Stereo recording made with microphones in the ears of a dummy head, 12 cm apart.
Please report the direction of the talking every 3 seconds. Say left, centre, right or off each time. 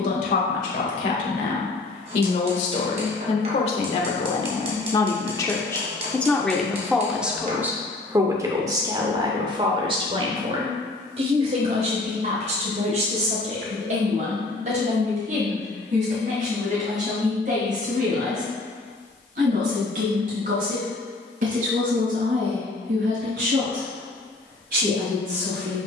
left, left, centre, right, right, right, right, right, right.